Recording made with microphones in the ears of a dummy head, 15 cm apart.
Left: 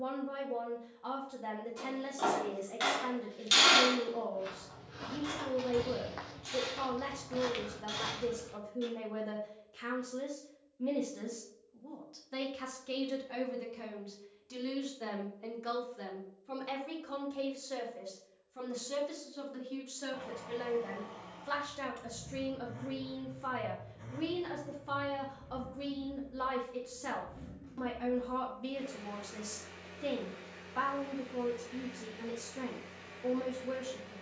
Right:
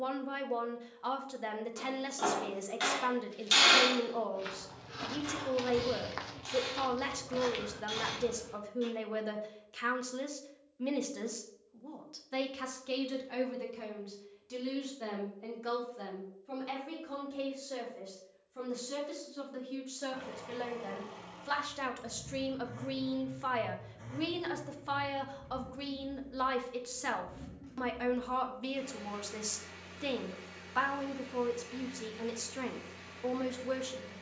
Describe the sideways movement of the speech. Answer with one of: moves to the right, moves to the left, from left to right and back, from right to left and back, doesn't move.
from right to left and back.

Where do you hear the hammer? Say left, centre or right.
centre.